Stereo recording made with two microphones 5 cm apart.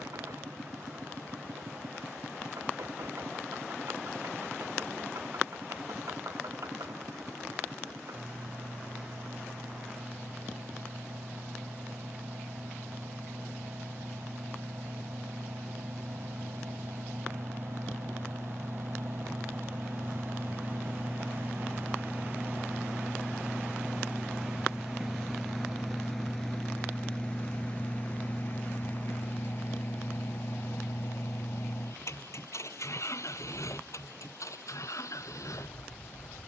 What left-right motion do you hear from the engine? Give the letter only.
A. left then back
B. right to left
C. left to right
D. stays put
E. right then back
B.